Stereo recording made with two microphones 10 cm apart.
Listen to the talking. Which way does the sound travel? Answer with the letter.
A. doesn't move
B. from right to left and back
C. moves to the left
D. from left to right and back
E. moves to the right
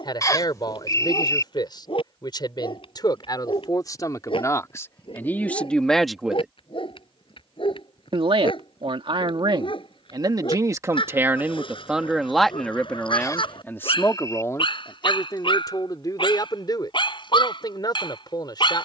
D.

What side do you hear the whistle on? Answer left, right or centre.
left.